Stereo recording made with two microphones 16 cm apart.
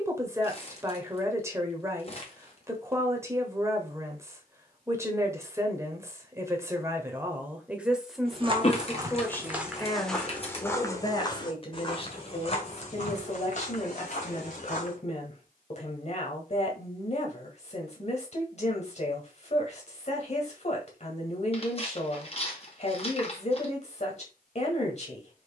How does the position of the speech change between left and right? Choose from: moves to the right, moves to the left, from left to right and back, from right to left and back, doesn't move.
moves to the left.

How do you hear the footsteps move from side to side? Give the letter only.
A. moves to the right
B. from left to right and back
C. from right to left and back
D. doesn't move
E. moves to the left
E.